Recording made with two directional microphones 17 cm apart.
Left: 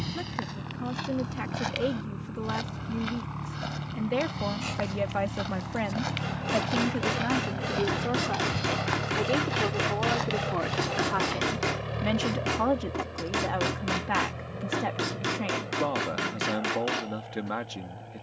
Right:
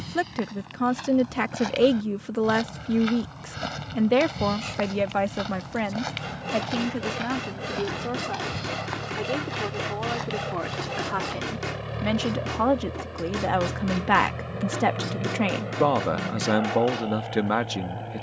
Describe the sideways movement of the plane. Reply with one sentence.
In this clip you hear the plane move to the right.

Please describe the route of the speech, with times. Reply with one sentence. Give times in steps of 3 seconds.
In this clip you hear the speech on the right from 0 s, in the centre from 6 s and on the right from 12 s.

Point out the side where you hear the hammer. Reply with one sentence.
In this clip you hear the hammer on the left.